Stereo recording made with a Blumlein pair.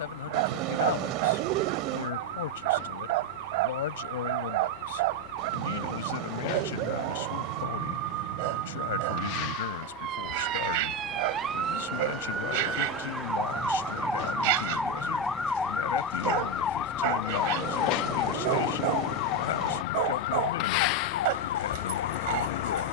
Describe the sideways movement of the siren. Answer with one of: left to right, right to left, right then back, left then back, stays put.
right to left.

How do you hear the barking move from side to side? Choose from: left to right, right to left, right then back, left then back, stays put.
stays put.